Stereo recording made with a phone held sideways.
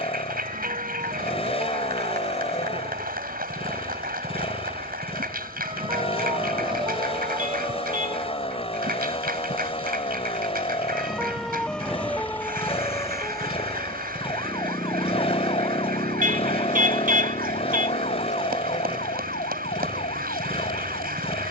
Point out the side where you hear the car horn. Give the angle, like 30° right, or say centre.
60° right.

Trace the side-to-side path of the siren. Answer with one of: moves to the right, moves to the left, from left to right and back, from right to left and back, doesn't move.
moves to the left.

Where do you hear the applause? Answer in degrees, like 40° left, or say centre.
80° right.